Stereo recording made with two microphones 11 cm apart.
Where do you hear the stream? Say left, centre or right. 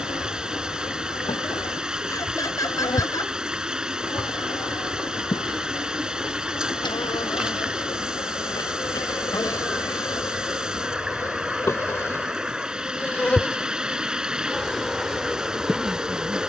centre.